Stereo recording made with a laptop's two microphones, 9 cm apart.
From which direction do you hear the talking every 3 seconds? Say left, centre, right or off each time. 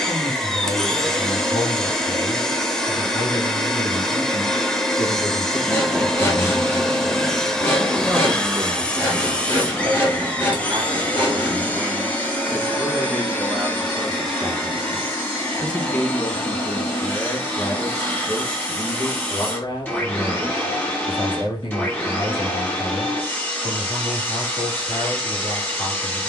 left, left, centre, right, centre, left, left, left, left.